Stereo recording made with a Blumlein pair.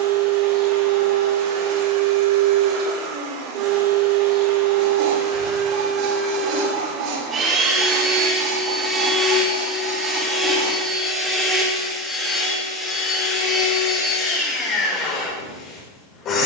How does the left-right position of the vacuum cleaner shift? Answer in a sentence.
You can hear the vacuum cleaner travel towards the left.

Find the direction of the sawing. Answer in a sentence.
You can hear the sawing on the right.